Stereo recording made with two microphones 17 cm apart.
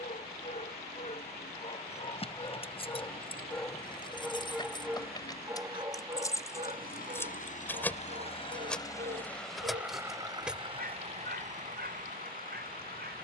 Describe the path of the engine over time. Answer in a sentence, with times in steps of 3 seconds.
In this clip you hear the engine on the left from 0 s and on the right from 9 s.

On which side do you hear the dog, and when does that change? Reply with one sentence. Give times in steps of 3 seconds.
In this clip you hear the dog on the left from 0 s, in the centre from 3 s and on the right from 6 s.